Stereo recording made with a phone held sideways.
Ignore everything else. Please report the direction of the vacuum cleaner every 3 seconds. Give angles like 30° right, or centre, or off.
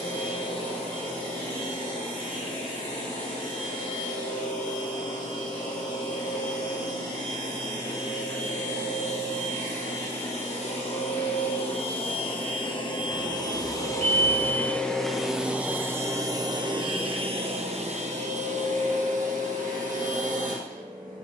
70° left, 70° left, 60° left, 50° left, 30° left, 30° right, 70° right.